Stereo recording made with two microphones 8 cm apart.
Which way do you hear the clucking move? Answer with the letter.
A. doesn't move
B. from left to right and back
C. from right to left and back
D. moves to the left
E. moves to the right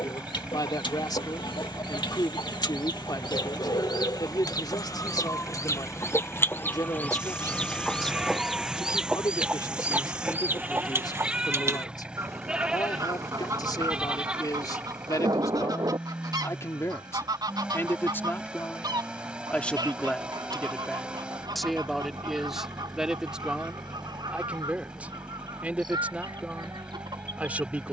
E.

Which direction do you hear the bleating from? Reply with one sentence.
In this clip you hear the bleating in the centre.